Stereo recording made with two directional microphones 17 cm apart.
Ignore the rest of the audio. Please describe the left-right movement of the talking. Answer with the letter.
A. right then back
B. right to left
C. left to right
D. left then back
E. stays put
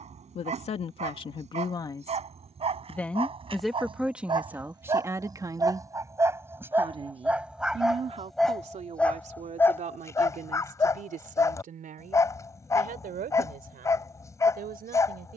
C.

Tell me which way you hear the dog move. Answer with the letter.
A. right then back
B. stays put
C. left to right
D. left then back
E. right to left
E.